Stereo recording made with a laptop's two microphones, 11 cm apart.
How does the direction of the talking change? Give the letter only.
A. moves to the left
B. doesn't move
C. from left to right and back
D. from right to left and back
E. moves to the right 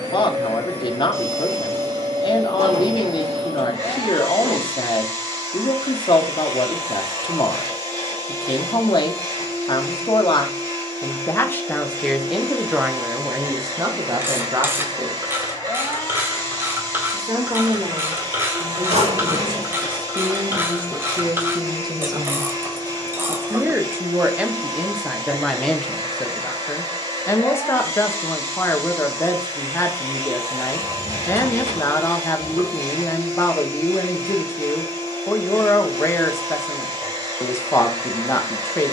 C.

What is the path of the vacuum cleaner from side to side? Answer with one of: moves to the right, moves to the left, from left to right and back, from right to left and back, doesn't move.
doesn't move.